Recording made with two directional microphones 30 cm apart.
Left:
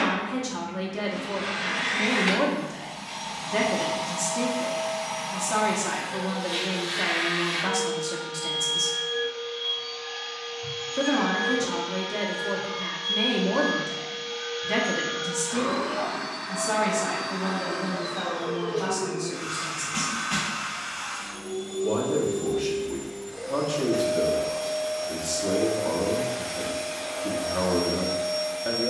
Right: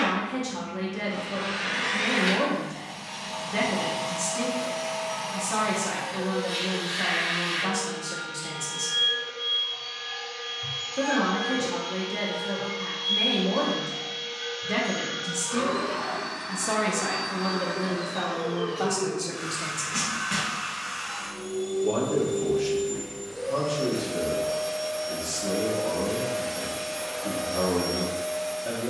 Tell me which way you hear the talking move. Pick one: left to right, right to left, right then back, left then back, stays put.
right then back.